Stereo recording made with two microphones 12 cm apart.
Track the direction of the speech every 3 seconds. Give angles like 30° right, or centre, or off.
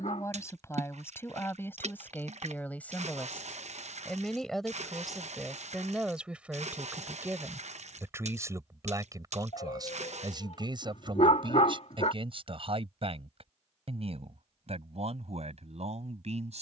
20° left, centre, 20° right, 40° right, 50° right, 60° right.